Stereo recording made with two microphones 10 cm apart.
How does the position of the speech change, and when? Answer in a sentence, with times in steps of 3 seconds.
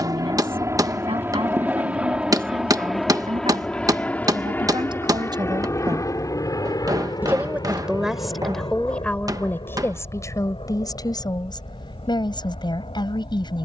You can hear the speech on the right from 0 s, in the centre from 6 s and on the left from 9 s.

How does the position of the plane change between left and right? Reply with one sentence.
You can hear the plane move to the left.